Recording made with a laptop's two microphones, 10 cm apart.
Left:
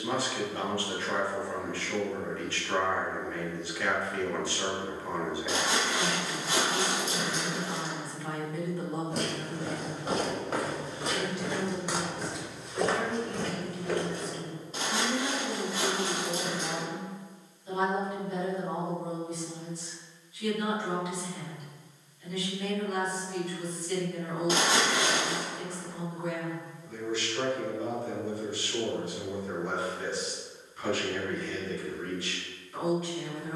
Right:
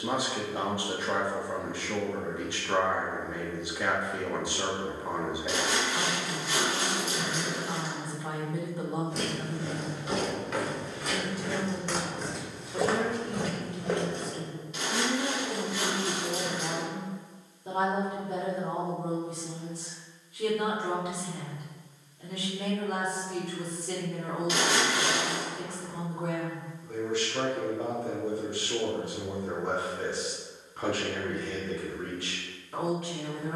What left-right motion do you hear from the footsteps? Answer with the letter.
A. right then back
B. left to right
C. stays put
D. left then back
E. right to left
B.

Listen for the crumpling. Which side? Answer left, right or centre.
left.